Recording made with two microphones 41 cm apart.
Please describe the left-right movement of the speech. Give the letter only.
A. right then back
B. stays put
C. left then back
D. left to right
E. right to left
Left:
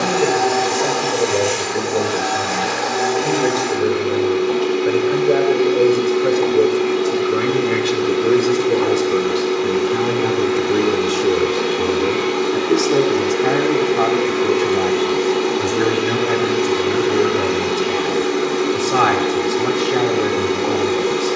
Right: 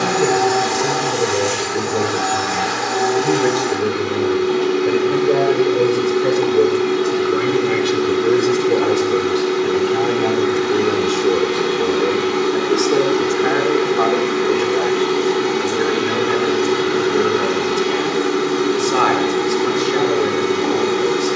E.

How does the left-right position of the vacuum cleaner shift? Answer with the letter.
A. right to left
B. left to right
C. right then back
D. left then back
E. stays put
E.